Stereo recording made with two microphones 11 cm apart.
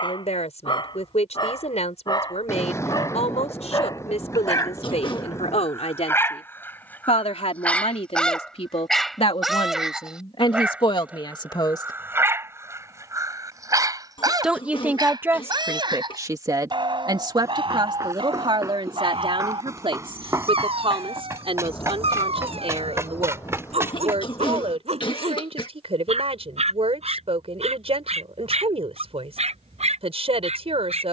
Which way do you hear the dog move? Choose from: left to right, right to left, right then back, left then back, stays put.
left to right.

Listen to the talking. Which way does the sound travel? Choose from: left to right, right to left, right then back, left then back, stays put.
left to right.